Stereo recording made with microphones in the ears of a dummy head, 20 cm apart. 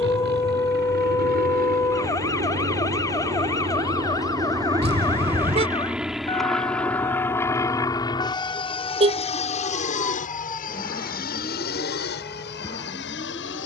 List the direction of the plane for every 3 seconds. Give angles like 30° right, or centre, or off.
40° right, 20° right, 10° left, 30° left, 50° left.